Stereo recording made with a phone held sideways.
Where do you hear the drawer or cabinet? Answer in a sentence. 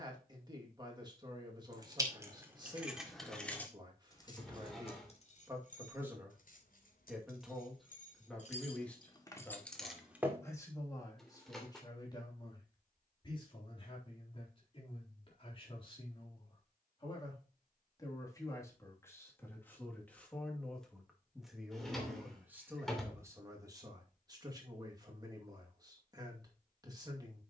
You can hear the drawer or cabinet in the centre.